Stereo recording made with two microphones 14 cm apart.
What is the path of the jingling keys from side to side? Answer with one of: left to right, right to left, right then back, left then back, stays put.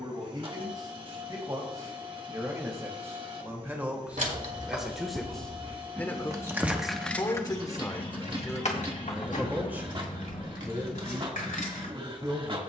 right to left.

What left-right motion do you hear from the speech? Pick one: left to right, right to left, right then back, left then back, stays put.
left then back.